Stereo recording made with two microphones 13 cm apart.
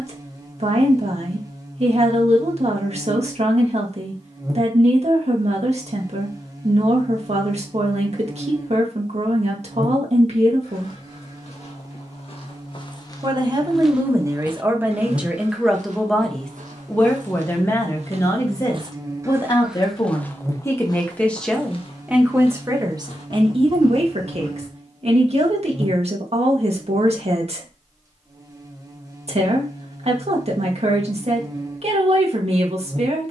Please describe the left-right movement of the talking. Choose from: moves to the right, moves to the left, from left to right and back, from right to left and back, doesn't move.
from right to left and back.